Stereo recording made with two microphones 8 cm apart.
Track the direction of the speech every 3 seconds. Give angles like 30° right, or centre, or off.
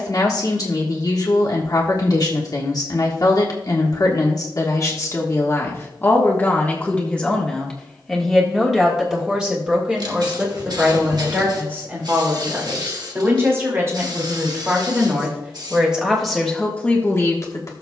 50° left, 40° left, 10° left, 20° right, 30° right, 10° left.